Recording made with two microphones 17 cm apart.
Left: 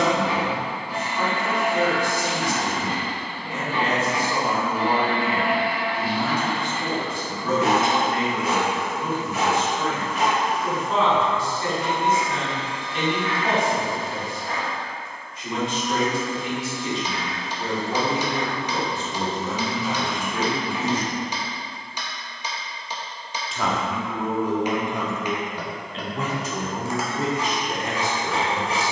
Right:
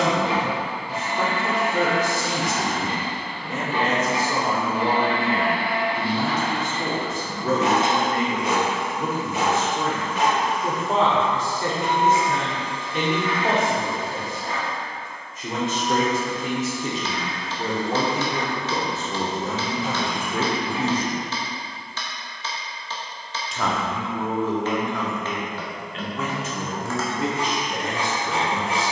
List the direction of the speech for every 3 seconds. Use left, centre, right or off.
right, right, right, right, right, right, right, centre, left, left.